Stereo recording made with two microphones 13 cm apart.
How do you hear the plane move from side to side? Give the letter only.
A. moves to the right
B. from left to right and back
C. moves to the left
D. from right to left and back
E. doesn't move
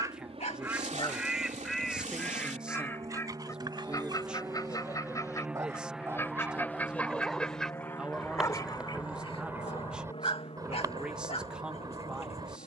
C.